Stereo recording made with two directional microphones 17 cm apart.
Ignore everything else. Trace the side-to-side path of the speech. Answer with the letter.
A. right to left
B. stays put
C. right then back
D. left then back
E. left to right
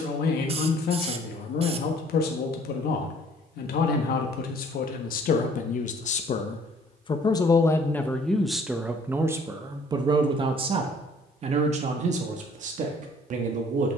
E.